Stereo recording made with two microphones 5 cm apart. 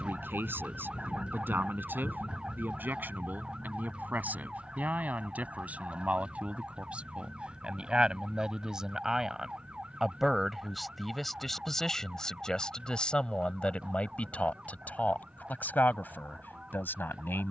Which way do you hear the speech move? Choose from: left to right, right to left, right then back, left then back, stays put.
right to left.